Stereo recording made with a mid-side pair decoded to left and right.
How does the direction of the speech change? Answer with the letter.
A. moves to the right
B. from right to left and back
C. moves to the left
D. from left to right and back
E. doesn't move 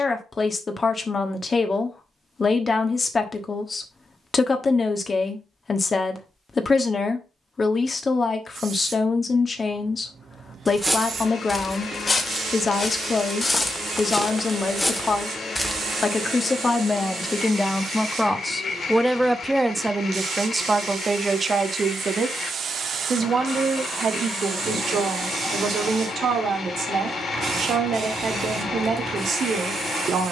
A.